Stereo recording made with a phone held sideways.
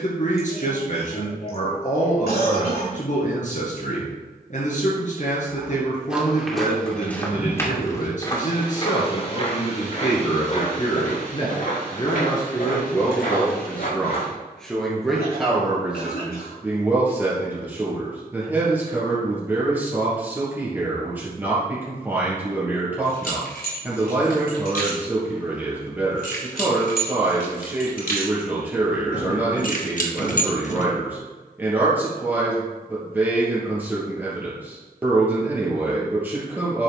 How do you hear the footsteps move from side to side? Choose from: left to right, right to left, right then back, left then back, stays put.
right to left.